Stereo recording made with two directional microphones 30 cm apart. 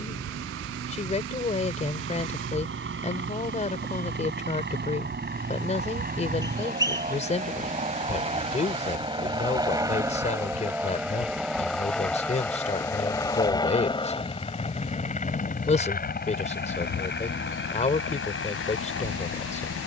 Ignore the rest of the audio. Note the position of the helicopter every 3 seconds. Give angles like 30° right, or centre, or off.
50° right, 40° right, 20° right, 10° right, 10° left, 30° left, 40° left.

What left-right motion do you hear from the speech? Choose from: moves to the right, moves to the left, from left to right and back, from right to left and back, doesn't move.
doesn't move.